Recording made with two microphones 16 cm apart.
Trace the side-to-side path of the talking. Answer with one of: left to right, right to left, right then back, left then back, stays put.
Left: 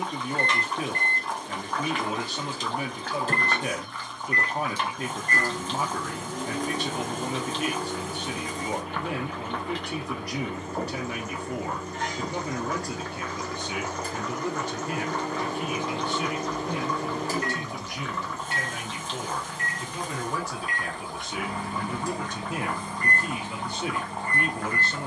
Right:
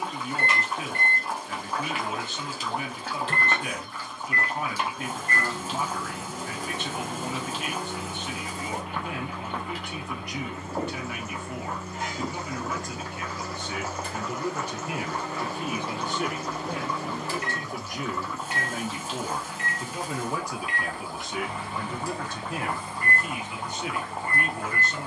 right then back.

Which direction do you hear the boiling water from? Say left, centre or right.
centre.